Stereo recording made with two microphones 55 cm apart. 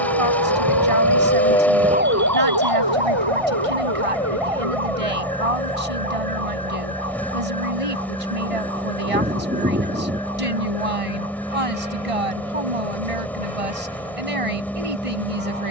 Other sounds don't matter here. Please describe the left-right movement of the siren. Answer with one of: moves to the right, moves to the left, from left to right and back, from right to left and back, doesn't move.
moves to the right.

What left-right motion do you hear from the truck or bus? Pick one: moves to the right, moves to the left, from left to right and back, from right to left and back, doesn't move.
doesn't move.